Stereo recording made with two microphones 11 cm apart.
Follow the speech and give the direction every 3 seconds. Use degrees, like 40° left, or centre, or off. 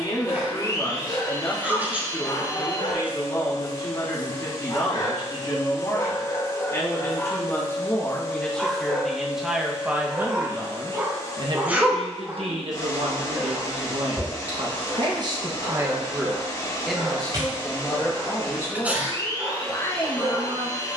40° left, 40° left, 20° left, 20° right, 60° right, 10° right, 30° left.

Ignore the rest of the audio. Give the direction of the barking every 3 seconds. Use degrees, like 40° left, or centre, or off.
60° left, 40° left, 10° left, 20° right, 30° right, 40° right, 50° right.